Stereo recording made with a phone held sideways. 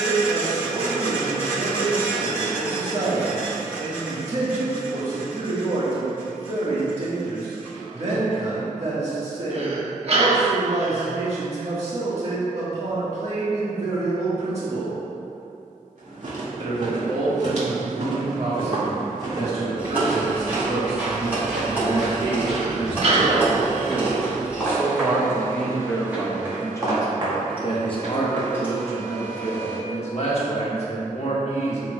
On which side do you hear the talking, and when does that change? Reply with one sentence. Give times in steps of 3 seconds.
In this clip you hear the talking on the right from 0 s, in the centre from 24 s and on the left from 27 s.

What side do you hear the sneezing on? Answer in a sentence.
In this clip you hear the sneezing on the right.